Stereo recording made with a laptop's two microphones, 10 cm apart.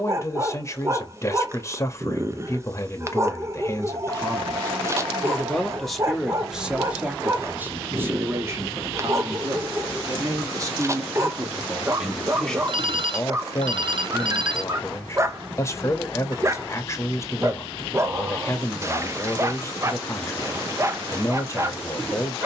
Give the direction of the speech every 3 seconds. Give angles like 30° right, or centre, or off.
30° left, 20° left, 20° right, 30° right, 20° left, 30° left, 30° left, 30° left.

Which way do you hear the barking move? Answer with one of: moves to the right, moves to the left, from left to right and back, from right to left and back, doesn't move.
doesn't move.